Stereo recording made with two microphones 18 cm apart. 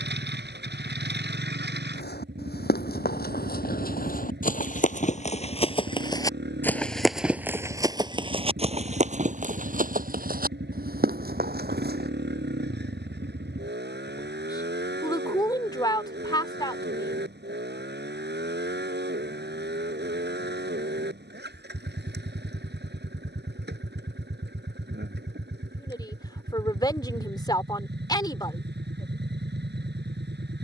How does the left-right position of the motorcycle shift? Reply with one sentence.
In this clip you hear the motorcycle stay put.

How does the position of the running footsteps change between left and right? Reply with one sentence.
In this clip you hear the running footsteps move from left to right.